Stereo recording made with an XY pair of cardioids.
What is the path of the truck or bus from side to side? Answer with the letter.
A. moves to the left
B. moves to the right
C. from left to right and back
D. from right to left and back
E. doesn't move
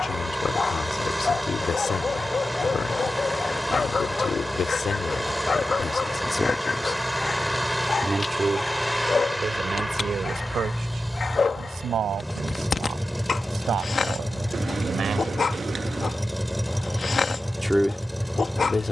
E.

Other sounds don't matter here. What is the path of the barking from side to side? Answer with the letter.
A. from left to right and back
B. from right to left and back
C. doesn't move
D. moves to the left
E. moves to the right
C.